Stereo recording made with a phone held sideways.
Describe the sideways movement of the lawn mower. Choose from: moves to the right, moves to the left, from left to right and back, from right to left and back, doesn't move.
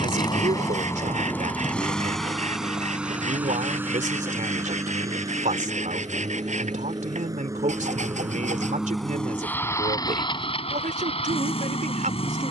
from left to right and back.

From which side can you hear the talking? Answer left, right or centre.
right.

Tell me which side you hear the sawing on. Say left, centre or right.
right.